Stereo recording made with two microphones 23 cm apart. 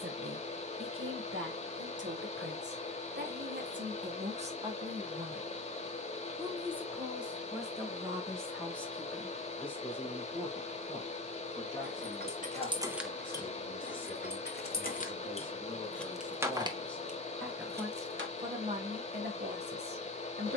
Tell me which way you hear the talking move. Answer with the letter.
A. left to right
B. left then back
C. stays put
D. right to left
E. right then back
B.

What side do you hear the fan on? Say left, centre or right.
left.